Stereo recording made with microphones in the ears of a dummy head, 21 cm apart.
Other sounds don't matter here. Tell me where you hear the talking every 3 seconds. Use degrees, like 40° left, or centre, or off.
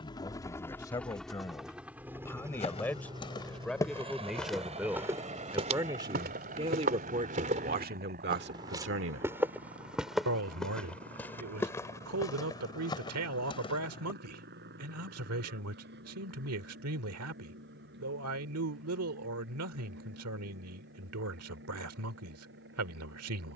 10° left, centre, 40° right, 70° right, 70° right, 70° right, 70° right, 70° right.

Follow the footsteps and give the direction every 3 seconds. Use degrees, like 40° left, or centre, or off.
30° left, centre, 30° right, centre, 20° left, off, off, off.